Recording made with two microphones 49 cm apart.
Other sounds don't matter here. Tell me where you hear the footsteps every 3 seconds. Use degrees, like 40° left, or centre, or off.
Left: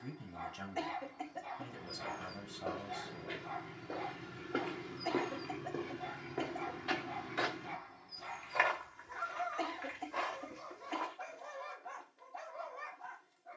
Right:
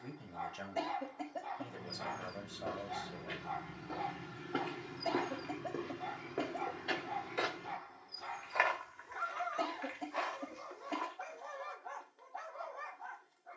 40° right, 20° right, 30° left, 70° left, off.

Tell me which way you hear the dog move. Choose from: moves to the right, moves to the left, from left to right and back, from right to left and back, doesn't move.
doesn't move.